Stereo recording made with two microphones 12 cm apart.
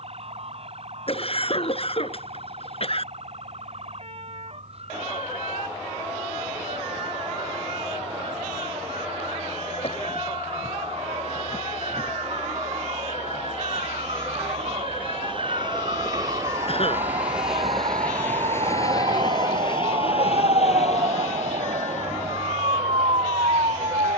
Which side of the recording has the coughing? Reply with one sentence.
You can hear the coughing on the left.